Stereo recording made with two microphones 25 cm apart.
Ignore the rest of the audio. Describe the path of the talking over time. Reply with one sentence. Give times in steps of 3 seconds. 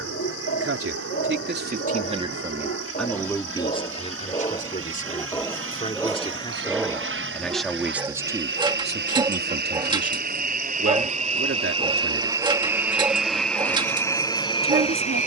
In this clip you hear the talking on the right from 0 s, on the left from 3 s, in the centre from 6 s and on the right from 9 s.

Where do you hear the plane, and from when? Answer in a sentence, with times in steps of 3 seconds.
You can hear the plane on the right from 0 s and in the centre from 12 s.